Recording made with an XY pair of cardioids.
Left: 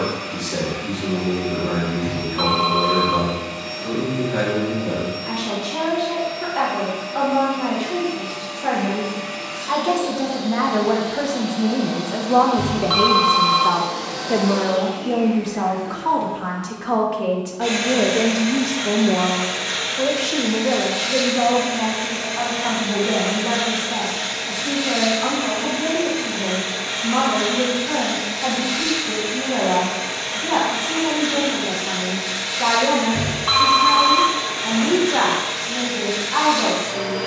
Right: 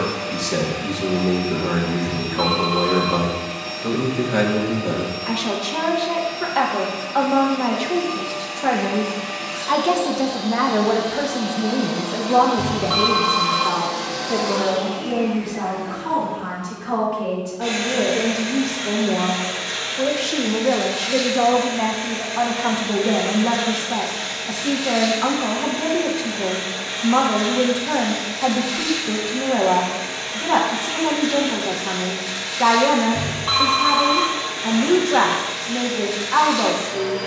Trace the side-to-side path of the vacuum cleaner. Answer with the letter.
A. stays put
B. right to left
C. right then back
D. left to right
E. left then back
B.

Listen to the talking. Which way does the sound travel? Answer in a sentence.
In this clip you hear the talking go left and come back.